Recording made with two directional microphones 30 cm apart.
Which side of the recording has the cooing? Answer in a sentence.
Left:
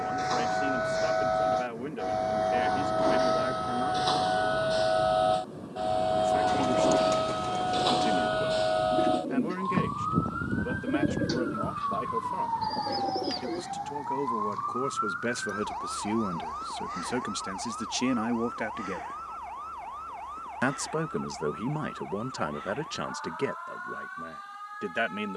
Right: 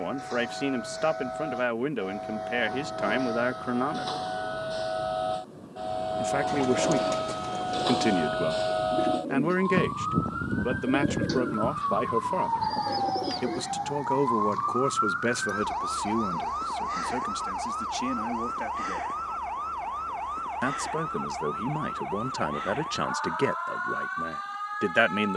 In this clip you hear the cooing in the centre.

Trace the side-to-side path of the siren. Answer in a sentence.
You can hear the siren move to the right.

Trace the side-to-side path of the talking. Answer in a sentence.
In this clip you hear the talking go left and come back.